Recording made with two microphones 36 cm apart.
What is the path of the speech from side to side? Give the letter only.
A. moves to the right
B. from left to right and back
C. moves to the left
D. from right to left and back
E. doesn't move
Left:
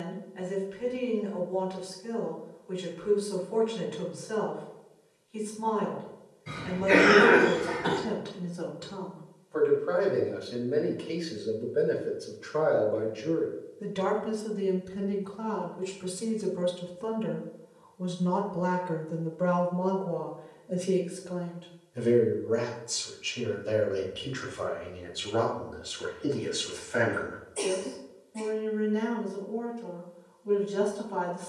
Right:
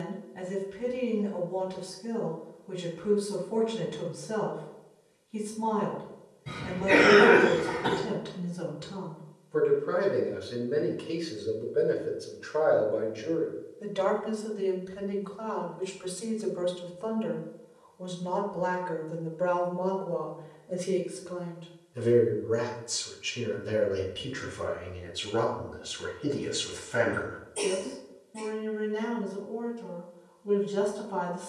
D.